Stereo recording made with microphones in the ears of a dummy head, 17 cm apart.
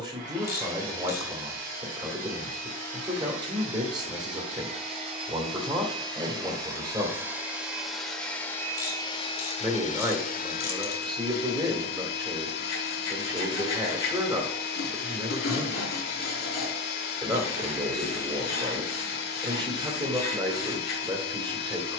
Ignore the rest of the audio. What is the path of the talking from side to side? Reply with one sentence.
In this clip you hear the talking stay in one place.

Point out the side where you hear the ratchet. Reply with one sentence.
You can hear the ratchet on the left.